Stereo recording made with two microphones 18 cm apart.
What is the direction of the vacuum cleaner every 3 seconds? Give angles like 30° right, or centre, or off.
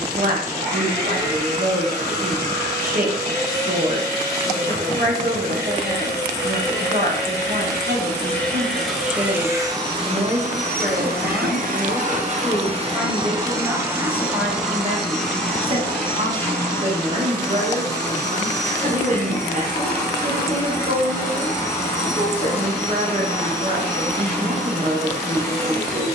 20° left, 20° left, 10° left, 40° right, 20° right, 10° left, 20° left, 20° left, 20° left.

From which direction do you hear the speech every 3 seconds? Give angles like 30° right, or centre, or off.
50° right, 50° right, 50° right, 10° right, 10° right, 40° right, 40° right, 40° right, 40° right.